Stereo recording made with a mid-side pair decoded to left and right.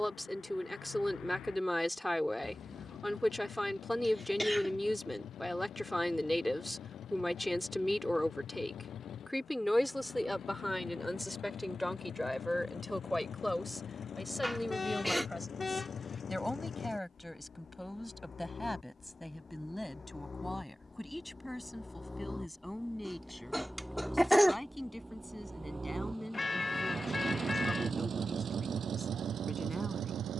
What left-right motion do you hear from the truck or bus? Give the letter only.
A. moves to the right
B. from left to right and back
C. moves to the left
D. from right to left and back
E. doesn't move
A.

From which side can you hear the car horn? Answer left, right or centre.
left.